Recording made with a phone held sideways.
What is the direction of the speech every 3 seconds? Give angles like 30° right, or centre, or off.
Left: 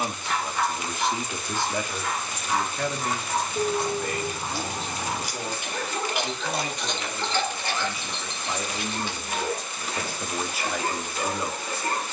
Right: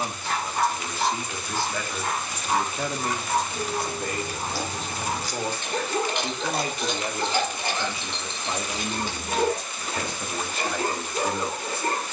10° left, 40° right, 30° right, 10° left.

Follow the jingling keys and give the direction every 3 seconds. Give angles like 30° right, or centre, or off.
off, 20° left, 10° right, 50° right.